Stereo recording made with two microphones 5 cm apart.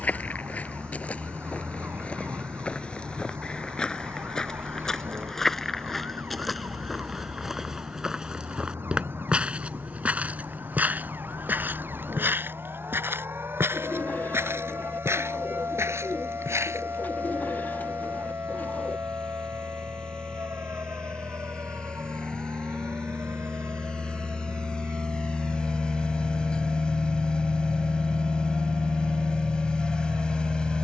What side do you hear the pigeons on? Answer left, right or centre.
left.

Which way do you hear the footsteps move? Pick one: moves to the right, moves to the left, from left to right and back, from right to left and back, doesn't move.
moves to the right.